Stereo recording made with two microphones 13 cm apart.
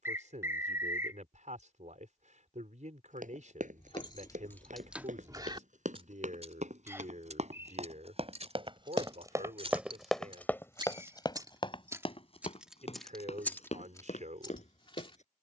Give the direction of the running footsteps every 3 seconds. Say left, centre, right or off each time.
off, right, right, centre, left.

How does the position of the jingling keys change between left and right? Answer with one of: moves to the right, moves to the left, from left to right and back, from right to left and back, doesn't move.
from left to right and back.